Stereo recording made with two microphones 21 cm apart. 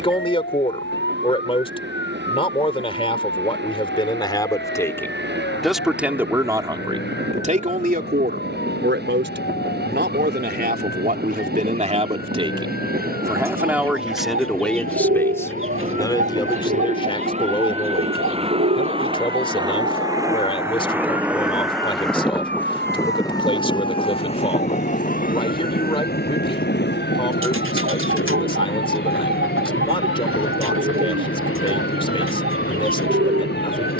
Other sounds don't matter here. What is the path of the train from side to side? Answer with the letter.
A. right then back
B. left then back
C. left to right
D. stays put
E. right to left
E.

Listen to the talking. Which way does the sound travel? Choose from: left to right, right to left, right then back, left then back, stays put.
right then back.